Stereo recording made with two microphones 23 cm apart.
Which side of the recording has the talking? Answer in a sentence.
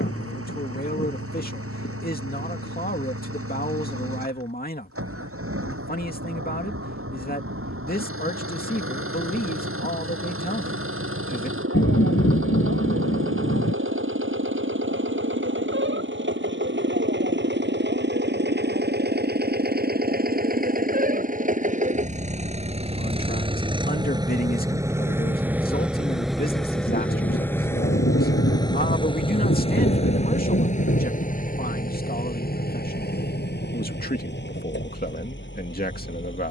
In this clip you hear the talking on the left.